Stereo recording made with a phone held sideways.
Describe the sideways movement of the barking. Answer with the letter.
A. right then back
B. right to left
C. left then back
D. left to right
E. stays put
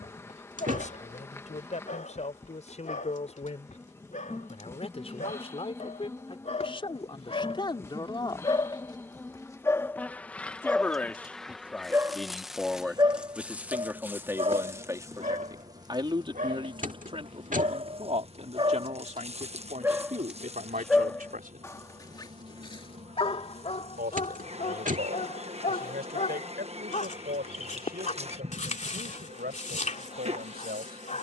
A.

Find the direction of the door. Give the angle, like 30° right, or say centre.
50° right.